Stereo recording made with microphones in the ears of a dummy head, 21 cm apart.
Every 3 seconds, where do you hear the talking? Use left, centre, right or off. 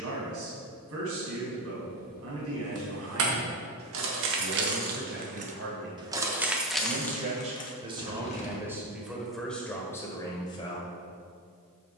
right, right, right, centre.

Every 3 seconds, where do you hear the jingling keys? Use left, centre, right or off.
right, right, centre, off.